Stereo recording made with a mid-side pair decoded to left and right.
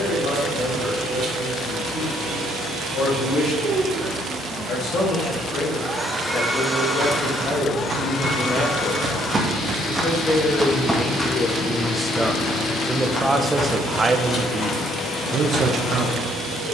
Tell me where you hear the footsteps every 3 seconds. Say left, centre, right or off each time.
off, off, right, centre, left, left.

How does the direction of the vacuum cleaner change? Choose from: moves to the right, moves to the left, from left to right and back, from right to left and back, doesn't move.
moves to the left.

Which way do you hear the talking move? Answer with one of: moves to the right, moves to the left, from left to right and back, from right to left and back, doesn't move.
moves to the right.